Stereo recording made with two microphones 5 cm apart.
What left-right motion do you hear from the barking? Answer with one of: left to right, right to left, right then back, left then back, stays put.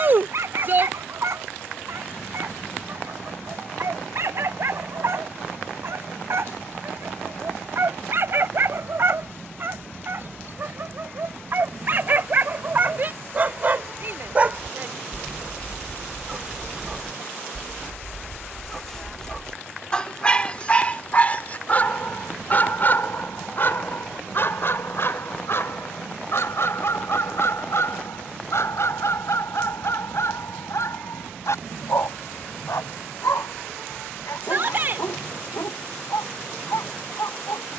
right to left.